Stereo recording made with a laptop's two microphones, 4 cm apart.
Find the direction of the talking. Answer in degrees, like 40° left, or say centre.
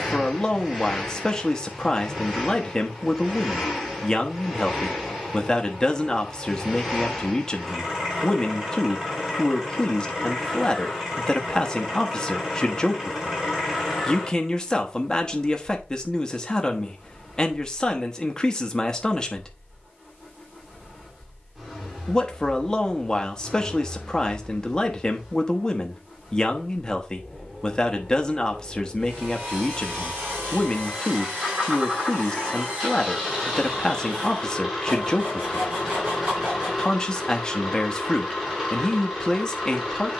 20° left.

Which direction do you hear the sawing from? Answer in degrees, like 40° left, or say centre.
40° right.